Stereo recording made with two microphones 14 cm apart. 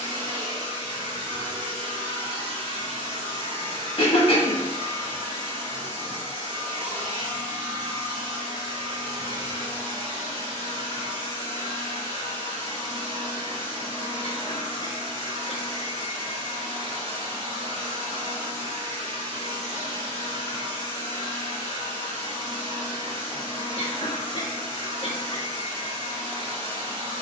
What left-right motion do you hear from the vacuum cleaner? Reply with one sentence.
You can hear the vacuum cleaner stay put.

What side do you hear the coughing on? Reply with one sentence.
You can hear the coughing on the left.